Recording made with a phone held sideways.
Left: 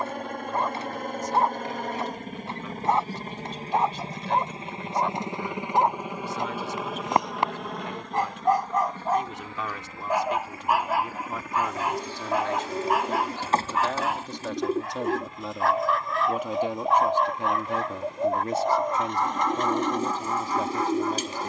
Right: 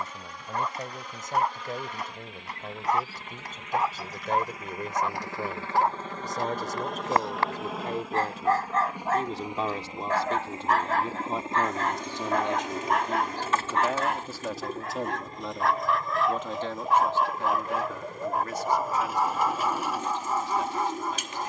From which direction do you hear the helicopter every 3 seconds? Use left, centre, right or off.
left, left, centre, right, right, right, right.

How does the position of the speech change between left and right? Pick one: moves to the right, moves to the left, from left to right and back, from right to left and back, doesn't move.
moves to the left.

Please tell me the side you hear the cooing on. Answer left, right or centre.
left.